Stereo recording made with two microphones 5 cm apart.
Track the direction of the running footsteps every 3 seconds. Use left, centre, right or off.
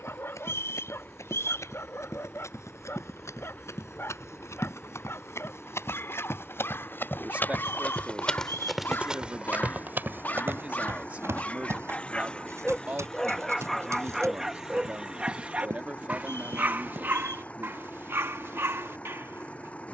left, left, left, right, right, right, off.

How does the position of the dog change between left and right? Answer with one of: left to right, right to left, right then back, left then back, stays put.
left to right.